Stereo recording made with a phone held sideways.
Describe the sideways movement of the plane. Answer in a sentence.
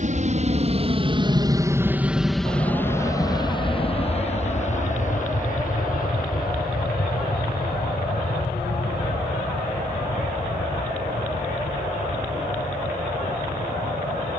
You can hear the plane move to the left.